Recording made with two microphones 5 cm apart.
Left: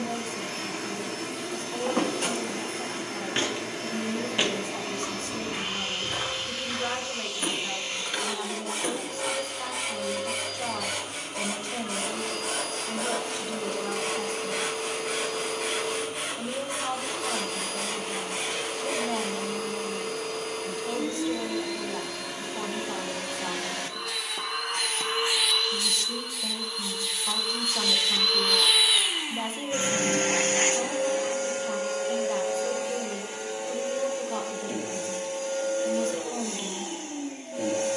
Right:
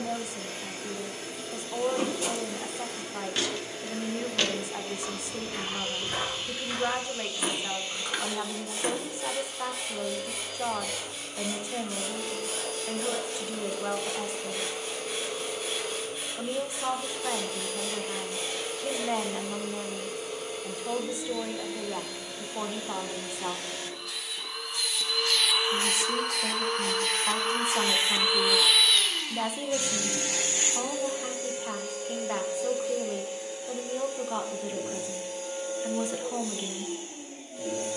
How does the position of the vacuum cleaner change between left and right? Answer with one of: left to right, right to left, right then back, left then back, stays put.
right then back.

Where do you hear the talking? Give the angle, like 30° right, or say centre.
10° right.